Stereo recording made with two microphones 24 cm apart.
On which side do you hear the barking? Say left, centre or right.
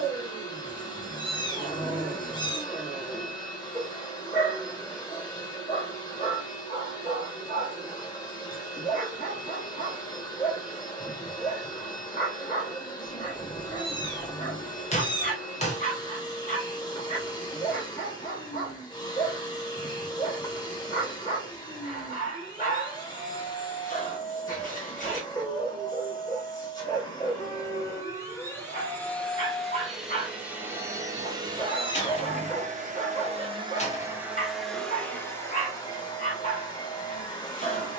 left.